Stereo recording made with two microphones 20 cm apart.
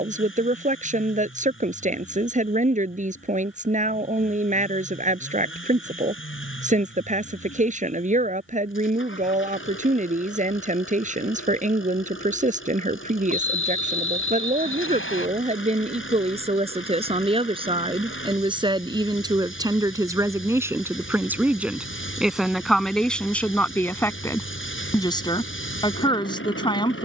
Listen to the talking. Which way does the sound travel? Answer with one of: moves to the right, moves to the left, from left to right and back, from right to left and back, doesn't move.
moves to the left.